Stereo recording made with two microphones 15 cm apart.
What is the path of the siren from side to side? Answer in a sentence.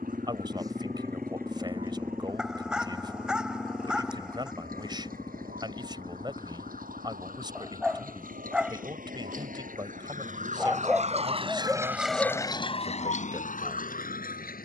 In this clip you hear the siren move from right to left.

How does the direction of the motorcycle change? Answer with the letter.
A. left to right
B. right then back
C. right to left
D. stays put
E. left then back
C.